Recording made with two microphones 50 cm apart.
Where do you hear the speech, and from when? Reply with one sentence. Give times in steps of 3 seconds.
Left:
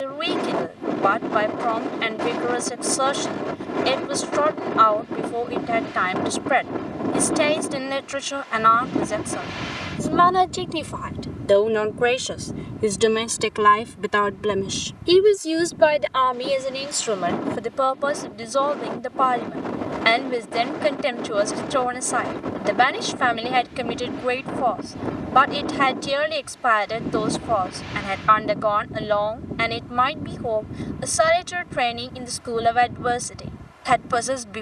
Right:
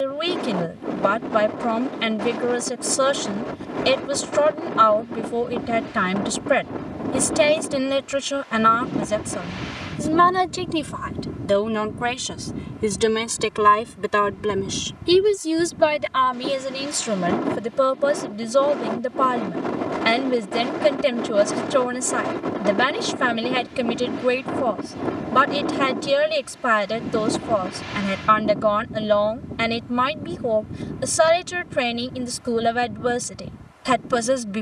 You can hear the speech on the right from 0 s, in the centre from 12 s and on the right from 15 s.